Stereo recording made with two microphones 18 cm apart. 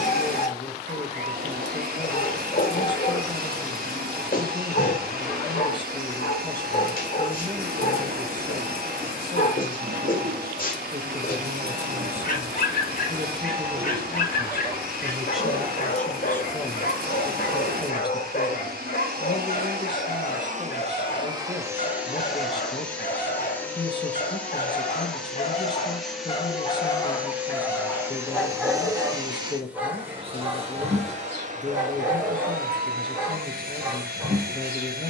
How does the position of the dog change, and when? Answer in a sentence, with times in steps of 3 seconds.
You can hear the dog on the left from 0 s and in the centre from 27 s.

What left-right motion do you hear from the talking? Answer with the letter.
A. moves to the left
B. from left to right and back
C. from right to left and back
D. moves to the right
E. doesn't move
B.